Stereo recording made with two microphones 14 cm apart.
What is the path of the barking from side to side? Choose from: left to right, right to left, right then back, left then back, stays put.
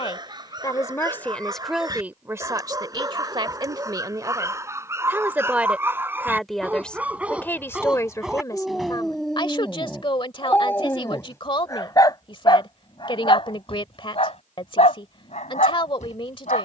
right to left.